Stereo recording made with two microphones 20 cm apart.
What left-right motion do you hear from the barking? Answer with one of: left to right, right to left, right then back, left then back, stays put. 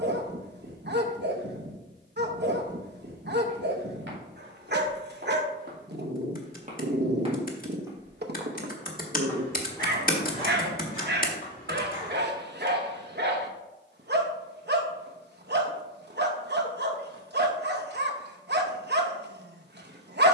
stays put.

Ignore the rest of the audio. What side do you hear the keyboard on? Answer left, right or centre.
left.